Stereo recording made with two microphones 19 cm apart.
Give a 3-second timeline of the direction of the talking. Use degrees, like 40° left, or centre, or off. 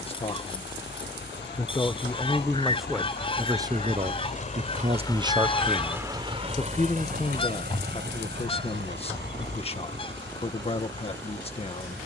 10° left, 20° right, 30° left, 30° left.